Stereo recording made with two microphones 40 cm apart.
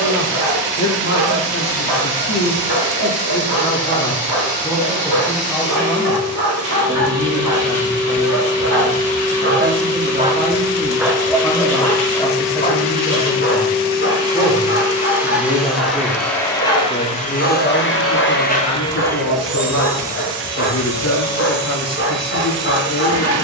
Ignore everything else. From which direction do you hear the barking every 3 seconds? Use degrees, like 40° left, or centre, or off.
80° right, 70° right, 60° right, 10° right, 30° left, 30° left, 30° left, 30° left.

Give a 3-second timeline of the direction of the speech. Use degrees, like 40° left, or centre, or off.
40° left, 10° left, 10° right, 10° right, centre, 20° left, 40° left, 40° left.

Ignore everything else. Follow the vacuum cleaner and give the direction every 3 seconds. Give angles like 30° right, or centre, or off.
20° right, 20° right, 20° right, 20° right, 10° right, 10° left, centre, 20° right.